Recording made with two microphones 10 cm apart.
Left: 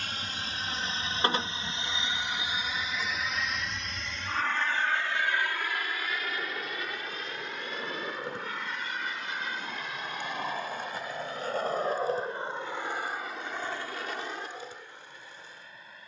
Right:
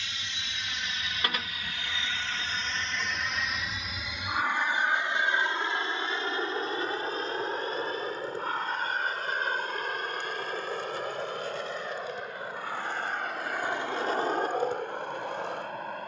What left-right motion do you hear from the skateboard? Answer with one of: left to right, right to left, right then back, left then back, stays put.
left to right.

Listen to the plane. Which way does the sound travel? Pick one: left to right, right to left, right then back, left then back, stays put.
left to right.